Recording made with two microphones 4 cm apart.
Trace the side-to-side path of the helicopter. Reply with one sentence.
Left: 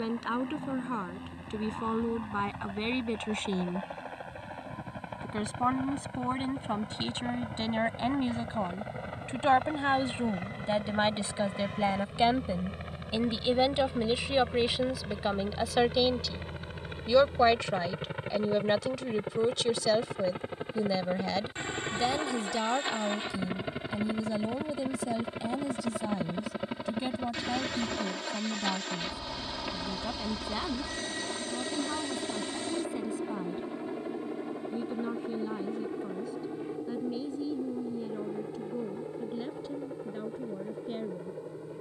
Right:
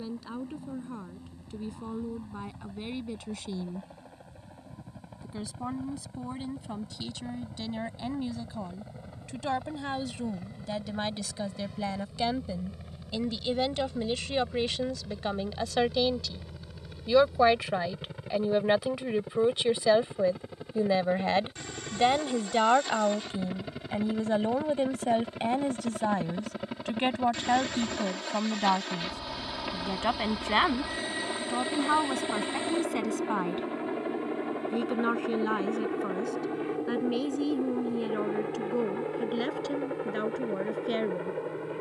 In this clip you hear the helicopter travel towards the right.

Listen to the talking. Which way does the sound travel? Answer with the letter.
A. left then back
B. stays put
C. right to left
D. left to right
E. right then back
D.